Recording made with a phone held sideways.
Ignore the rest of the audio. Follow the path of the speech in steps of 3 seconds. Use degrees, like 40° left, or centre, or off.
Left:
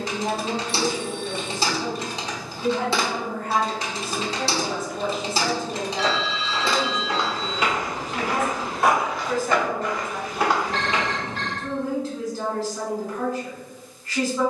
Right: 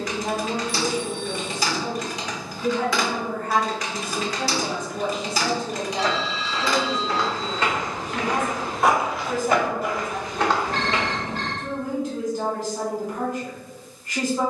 30° left, 10° left, 10° right, 20° right, 20° right.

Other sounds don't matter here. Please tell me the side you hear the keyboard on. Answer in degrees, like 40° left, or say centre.
30° left.